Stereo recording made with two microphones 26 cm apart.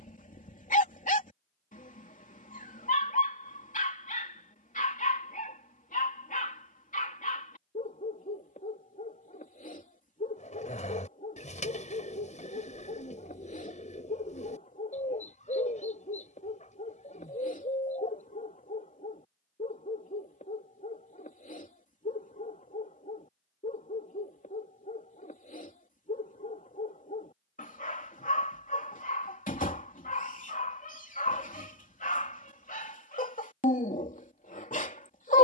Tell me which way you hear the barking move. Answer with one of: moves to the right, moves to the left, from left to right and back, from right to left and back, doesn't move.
doesn't move.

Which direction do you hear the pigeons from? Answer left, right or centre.
left.